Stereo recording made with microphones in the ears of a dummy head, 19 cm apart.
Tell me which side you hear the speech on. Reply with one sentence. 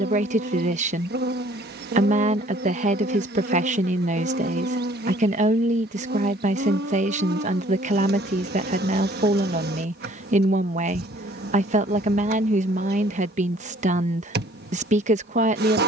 In this clip you hear the speech on the right.